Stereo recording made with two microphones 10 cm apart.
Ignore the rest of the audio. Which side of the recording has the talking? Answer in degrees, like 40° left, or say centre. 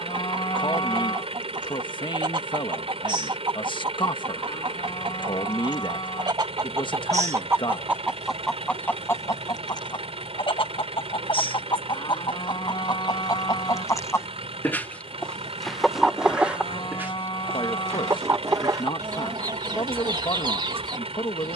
50° left.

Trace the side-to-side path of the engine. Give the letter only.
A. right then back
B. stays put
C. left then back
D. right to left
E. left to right
B.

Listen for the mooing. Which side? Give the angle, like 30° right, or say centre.
50° left.